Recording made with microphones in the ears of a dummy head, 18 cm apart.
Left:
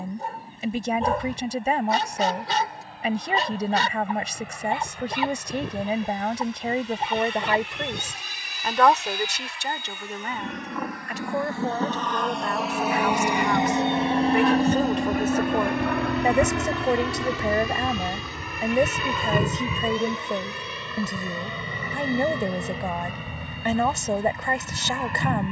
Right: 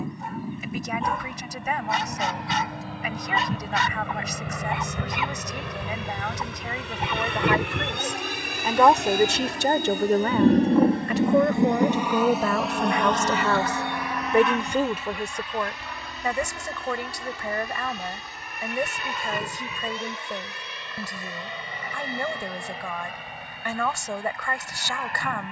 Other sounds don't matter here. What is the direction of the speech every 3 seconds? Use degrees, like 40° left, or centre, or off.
30° left, 30° left, 20° left, 50° right, 50° right, 20° left, 20° left, 20° left, 20° left.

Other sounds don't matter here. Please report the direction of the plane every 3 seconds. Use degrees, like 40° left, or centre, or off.
70° right, 70° right, 60° right, 30° right, 10° left, 50° left, 60° left, 70° left, 80° left.